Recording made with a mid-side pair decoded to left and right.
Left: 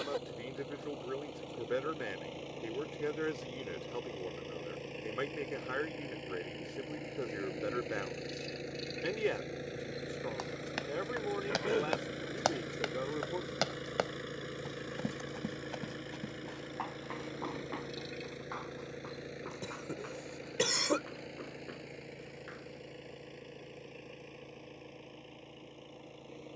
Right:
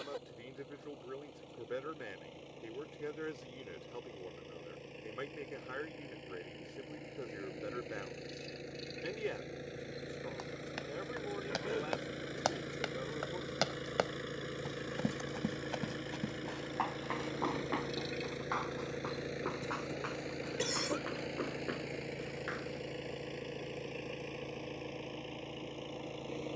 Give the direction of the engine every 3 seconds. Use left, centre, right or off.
left, left, left, left, centre, centre, right, right, right.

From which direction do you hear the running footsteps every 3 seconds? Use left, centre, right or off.
off, off, off, left, centre, right, right, right, off.